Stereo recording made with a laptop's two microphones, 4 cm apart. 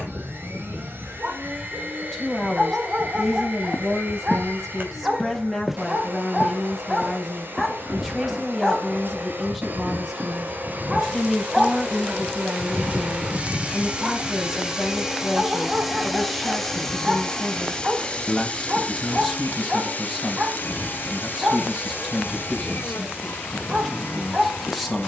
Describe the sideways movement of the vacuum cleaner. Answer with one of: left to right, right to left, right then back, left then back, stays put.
right to left.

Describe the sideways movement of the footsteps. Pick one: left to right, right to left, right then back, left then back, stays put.
left to right.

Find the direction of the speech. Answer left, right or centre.
centre.